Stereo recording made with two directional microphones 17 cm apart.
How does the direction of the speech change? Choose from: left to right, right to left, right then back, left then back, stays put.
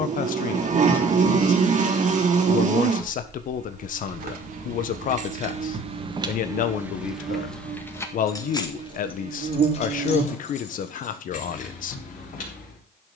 stays put.